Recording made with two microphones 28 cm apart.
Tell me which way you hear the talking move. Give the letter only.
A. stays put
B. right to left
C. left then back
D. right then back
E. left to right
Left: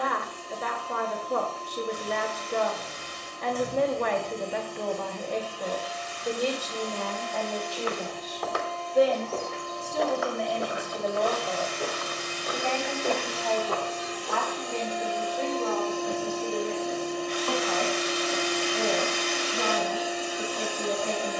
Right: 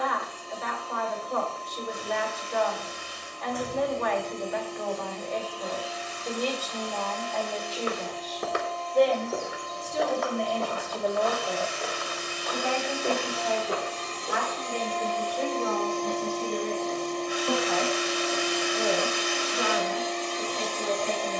E.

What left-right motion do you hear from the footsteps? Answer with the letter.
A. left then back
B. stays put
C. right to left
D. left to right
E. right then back
A.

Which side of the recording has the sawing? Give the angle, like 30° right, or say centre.
10° right.